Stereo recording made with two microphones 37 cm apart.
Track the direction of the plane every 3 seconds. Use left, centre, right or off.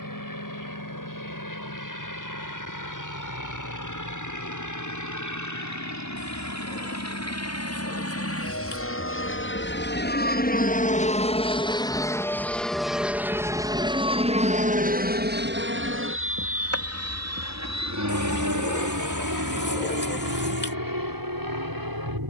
left, left, left, left, centre, right, right, right.